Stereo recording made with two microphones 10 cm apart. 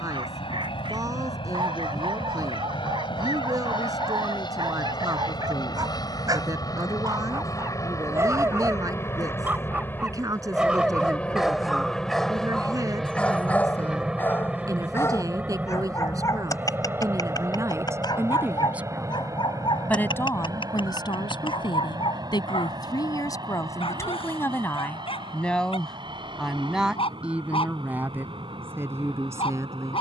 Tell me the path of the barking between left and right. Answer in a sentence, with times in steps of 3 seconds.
In this clip you hear the barking on the right from 0 s, in the centre from 9 s and on the left from 15 s.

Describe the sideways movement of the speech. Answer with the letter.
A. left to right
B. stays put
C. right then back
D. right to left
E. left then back
E.